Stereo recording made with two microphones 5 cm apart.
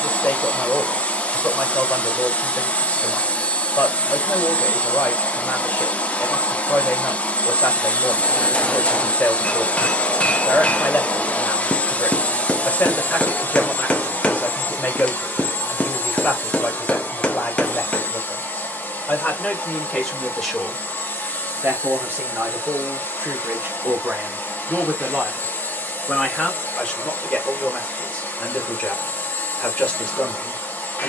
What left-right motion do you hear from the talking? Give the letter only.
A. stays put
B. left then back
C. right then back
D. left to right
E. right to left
C.